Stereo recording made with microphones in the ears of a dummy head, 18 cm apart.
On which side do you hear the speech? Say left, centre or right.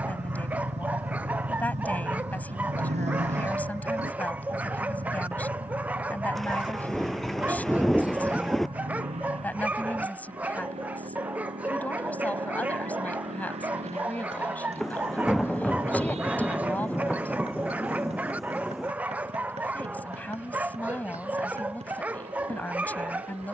centre.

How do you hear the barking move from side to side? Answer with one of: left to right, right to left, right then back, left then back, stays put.
stays put.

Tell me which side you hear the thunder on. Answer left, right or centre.
centre.